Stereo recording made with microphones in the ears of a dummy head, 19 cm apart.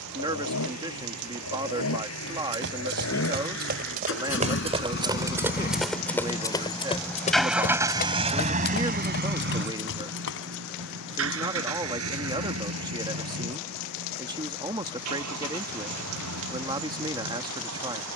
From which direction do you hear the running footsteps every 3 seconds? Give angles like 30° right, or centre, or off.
60° right, 30° right, 30° left, 60° left, off, off.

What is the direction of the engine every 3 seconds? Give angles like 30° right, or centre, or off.
70° left, 60° left, centre, 60° right, 80° right, 80° right.